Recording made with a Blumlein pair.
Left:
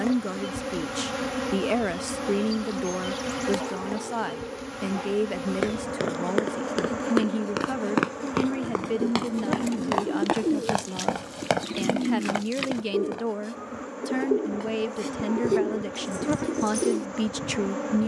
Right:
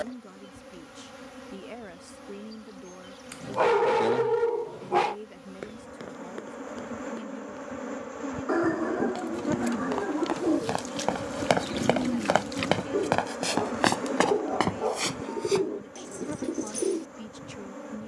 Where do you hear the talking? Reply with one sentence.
You can hear the talking on the left.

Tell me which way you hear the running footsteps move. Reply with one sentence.
You can hear the running footsteps move from left to right.